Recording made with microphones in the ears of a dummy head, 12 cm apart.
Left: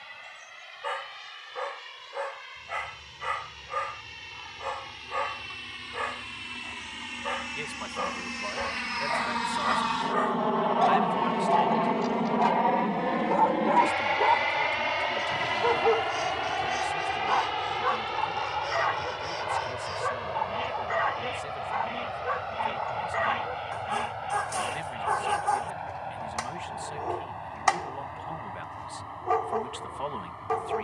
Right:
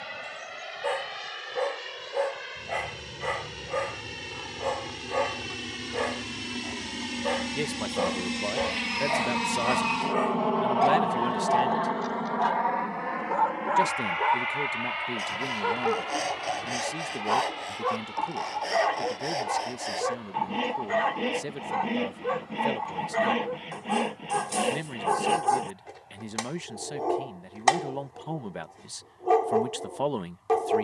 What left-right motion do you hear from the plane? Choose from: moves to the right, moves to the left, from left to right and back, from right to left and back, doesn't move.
moves to the left.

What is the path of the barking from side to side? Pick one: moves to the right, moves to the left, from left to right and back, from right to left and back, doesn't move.
from right to left and back.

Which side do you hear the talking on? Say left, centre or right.
right.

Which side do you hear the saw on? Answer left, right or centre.
right.